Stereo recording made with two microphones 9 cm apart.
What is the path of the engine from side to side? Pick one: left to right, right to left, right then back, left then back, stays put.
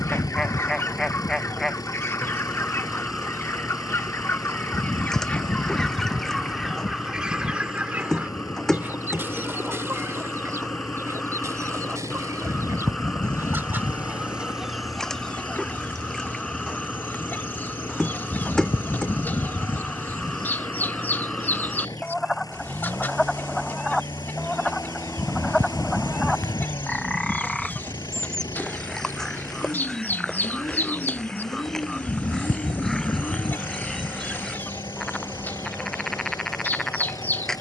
stays put.